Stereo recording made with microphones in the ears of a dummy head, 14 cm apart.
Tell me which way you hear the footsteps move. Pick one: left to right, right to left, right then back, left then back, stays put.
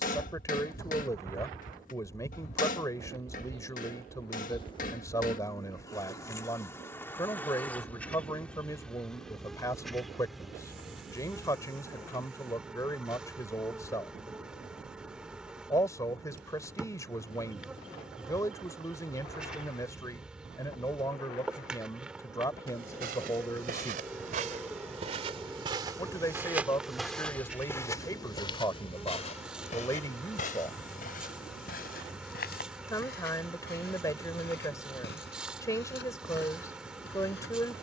right to left.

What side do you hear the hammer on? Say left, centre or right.
left.